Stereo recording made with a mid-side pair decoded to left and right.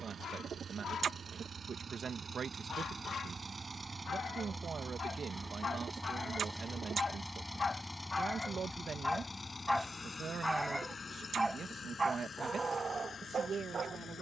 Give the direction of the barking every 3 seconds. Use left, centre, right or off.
left, left, left, centre, right.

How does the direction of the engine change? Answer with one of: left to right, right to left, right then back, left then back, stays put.
right to left.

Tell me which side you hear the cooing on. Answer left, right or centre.
right.